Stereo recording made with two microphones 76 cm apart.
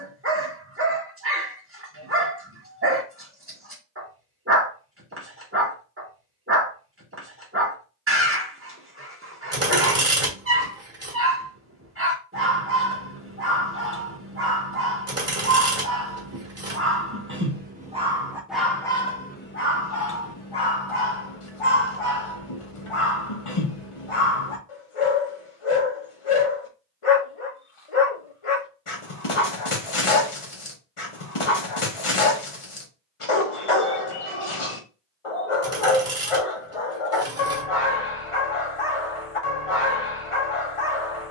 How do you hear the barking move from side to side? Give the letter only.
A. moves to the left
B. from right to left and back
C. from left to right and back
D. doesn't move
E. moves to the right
A.